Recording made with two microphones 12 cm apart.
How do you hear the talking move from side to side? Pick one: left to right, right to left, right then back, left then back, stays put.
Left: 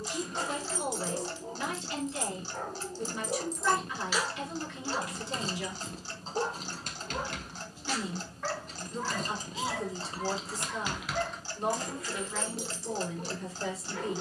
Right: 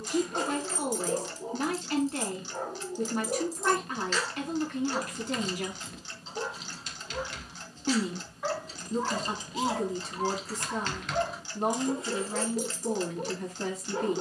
stays put.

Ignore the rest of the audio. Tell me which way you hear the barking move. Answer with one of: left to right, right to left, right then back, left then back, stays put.
left then back.